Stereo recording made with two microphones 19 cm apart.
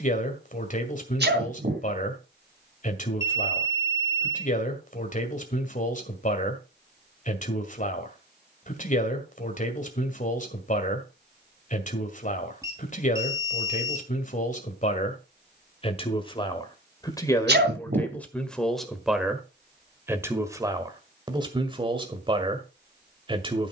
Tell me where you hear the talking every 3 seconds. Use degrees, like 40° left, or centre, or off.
40° left, 40° left, 40° left, 40° left, 40° left, 20° left, 10° right, 30° right.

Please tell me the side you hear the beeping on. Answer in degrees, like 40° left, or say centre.
20° right.